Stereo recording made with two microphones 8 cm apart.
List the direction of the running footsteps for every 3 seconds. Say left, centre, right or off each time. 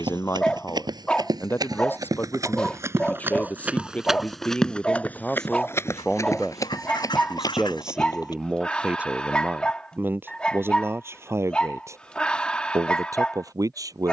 right, centre, left, off, off.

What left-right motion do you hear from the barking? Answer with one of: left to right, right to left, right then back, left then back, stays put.
stays put.